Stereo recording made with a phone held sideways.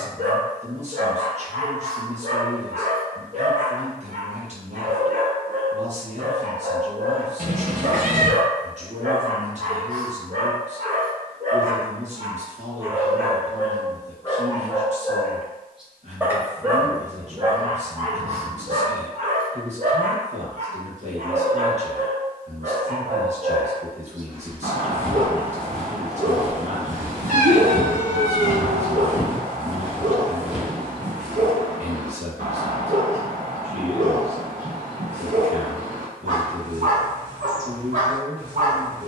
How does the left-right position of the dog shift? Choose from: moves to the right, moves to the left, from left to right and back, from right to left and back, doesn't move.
from right to left and back.